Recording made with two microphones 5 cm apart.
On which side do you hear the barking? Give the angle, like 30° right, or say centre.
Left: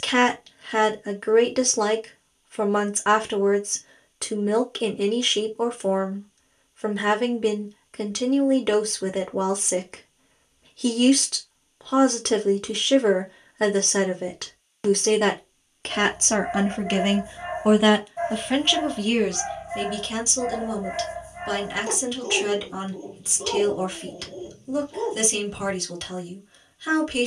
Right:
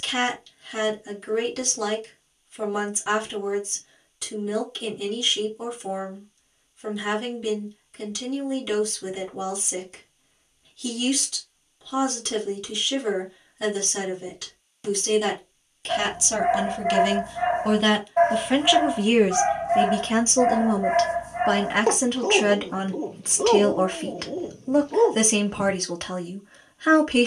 60° right.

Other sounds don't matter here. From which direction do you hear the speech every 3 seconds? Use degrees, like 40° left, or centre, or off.
50° left, 50° left, 50° left, 50° left, 50° left, 40° left, 30° right, 40° right, 40° right.